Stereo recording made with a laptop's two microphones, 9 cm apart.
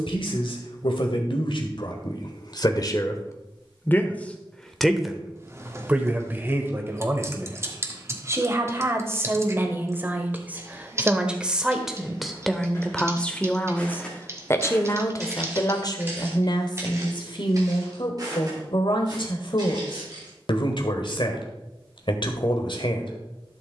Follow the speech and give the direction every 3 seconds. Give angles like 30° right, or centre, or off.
60° left, 20° left, 30° right, 20° right, 10° left, 50° left, 60° left, 60° left.